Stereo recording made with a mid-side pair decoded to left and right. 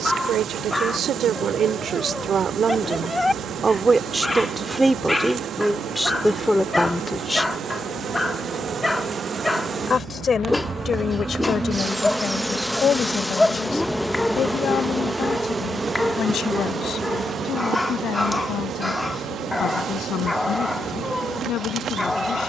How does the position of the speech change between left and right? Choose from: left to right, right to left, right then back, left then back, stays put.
right to left.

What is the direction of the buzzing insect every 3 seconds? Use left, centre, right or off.
right, right, right, right, centre, right, right, right.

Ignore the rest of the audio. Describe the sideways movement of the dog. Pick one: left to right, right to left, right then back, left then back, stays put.
stays put.